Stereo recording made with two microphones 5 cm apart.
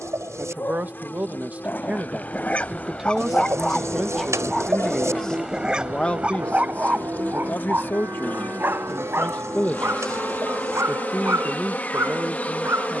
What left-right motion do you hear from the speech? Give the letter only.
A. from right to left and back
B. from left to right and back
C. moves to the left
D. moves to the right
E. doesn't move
A.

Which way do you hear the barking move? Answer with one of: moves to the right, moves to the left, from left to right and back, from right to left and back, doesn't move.
moves to the right.